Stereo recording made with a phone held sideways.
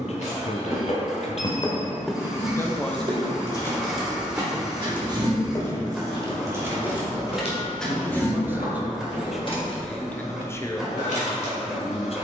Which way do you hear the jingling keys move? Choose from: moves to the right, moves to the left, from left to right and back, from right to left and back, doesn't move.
from left to right and back.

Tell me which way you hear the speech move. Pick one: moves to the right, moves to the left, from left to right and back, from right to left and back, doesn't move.
from left to right and back.